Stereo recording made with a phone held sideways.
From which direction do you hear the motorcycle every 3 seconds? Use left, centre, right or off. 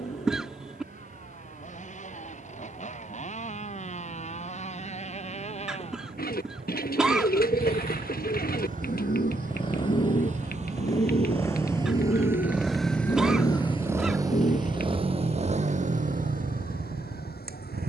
left, left, left, left, centre, right.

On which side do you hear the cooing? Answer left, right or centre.
left.